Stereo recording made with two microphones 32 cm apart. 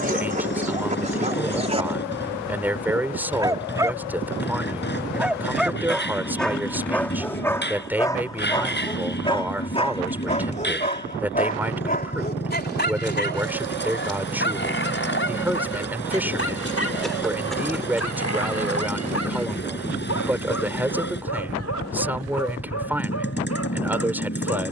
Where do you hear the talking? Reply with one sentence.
You can hear the talking in the centre.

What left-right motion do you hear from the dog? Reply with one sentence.
In this clip you hear the dog go from the right side to the left.